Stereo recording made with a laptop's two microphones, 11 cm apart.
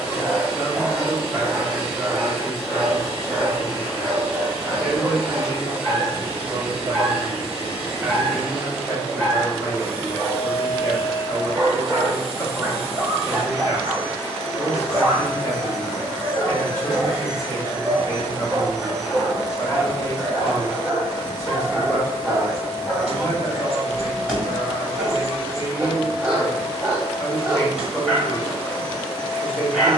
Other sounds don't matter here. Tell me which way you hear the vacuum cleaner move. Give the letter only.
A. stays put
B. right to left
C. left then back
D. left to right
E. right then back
A.